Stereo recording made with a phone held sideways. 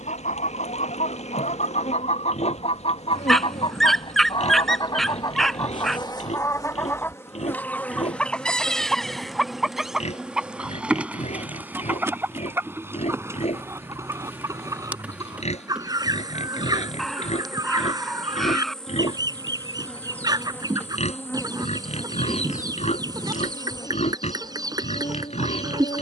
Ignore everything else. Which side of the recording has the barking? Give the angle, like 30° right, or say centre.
centre.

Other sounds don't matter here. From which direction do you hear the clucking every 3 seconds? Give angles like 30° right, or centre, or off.
50° left, 30° left, 10° left, centre, 20° right, 20° right, 20° right, 20° right, 20° right.